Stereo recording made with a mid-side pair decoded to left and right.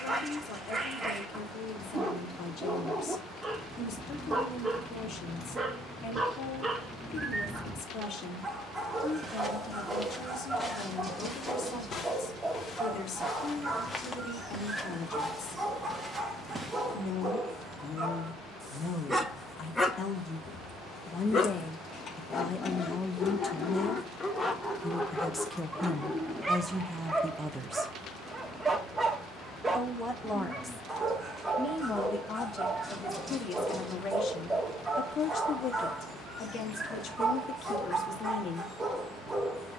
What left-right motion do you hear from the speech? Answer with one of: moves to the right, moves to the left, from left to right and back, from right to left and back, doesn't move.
from left to right and back.